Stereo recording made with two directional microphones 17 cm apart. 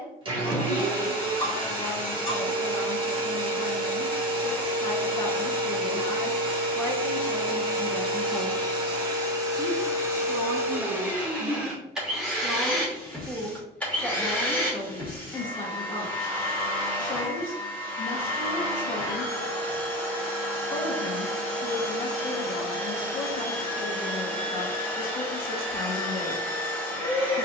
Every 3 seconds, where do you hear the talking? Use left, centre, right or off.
left, left, centre, right, centre, left, left, left, left.